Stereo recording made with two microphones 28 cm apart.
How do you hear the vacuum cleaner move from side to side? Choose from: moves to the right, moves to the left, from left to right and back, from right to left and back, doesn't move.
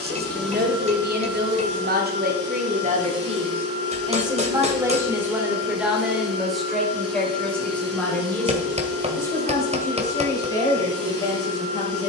doesn't move.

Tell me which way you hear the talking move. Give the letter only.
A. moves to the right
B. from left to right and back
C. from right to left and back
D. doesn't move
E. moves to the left
E.